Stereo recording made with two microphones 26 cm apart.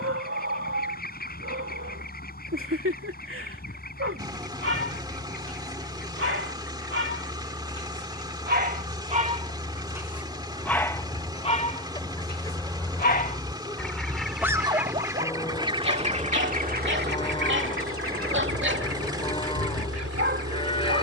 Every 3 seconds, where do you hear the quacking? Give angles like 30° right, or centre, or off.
40° left, 40° left, 30° left, 20° left, 10° left, 30° right, 60° right.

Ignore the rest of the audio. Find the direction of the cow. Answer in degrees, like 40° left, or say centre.
20° left.